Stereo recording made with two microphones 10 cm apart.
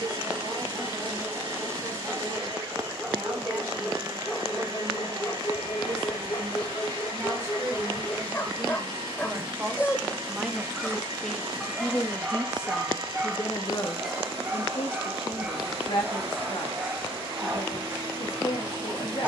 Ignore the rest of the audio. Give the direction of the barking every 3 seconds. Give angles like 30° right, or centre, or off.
20° right, 20° left, 30° left, 10° left, 10° right, 20° right, 20° right.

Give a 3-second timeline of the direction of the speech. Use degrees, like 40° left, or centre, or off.
50° right, 40° right, 30° right, 10° right, 40° left, 60° left, 60° left.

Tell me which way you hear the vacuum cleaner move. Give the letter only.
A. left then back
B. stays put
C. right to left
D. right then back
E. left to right
B.